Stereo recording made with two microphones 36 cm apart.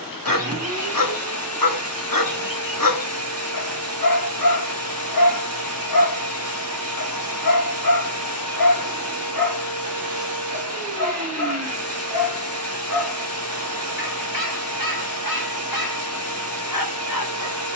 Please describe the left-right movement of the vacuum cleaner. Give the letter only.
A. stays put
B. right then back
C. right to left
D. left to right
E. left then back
A.